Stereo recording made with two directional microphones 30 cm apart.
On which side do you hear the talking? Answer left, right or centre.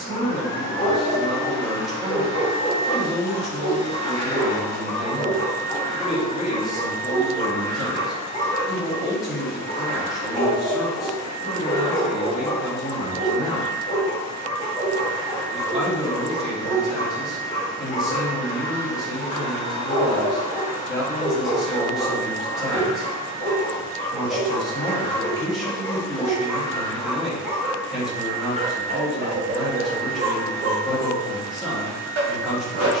centre.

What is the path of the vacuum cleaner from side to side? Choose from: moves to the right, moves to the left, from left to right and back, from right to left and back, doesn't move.
doesn't move.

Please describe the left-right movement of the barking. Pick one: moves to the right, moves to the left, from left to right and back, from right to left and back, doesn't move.
moves to the right.